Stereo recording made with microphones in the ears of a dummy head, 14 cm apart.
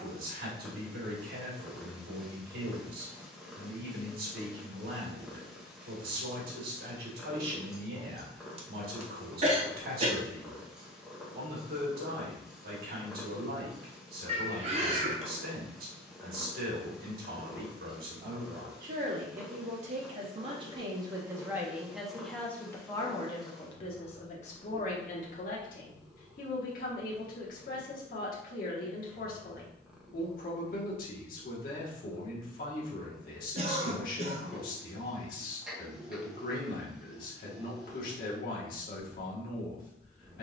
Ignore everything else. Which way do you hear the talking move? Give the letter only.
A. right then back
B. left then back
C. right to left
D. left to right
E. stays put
C.